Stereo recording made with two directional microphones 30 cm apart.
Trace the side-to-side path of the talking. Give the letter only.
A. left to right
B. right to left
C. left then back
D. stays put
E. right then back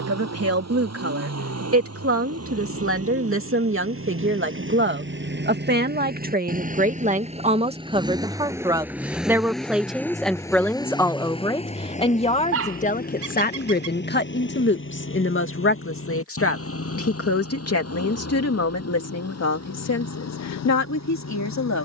B.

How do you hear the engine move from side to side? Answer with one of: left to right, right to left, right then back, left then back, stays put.
right to left.